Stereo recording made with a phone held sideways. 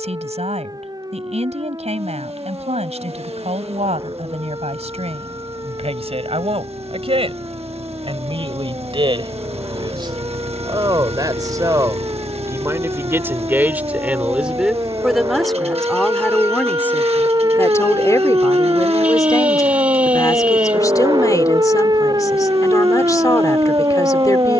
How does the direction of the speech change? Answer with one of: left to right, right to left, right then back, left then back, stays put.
right to left.